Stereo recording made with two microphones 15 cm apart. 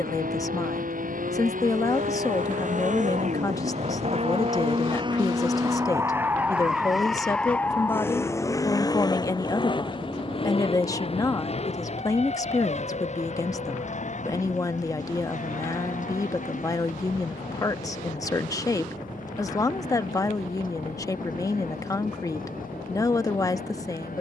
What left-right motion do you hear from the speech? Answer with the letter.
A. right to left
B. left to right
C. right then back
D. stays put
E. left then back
D.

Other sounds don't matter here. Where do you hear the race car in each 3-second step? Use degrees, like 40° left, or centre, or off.
70° right, 40° right, 10° left, 40° left, 50° left, 60° left, 60° left, 60° left.